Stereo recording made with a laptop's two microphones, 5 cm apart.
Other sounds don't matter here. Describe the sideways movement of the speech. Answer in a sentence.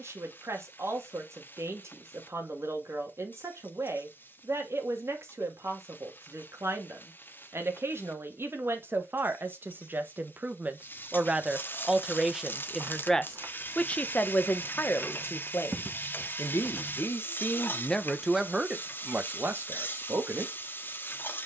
In this clip you hear the speech move from right to left and back again.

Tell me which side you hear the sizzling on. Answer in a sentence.
In this clip you hear the sizzling on the left.